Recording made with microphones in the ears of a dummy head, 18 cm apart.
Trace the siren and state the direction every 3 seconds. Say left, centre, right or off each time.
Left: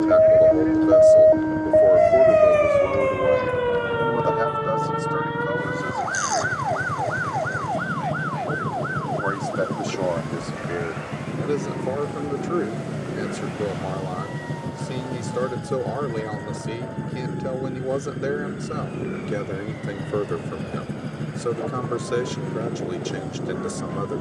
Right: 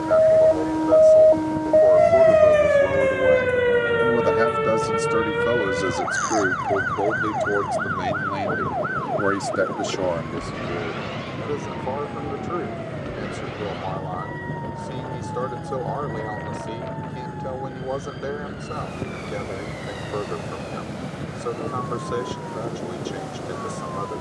centre, right, right, right, right, right, right, right.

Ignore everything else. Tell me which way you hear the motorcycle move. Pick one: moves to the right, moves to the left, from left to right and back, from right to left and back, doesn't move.
doesn't move.